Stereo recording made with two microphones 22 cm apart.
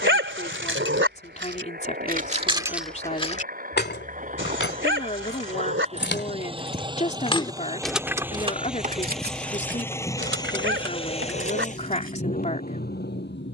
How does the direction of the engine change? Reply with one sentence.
In this clip you hear the engine travel towards the left.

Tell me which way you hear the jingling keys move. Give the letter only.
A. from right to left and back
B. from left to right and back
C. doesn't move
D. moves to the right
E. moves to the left
A.